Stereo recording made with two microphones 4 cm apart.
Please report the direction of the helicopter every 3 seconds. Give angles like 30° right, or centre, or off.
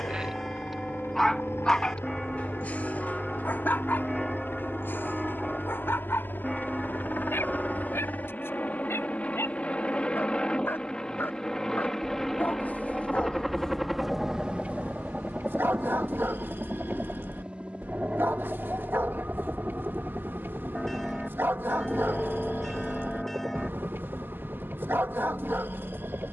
60° left, 50° left, 40° left, 20° left, centre, 20° right, 30° right, 40° right, 50° right.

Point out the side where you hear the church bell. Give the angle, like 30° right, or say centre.
centre.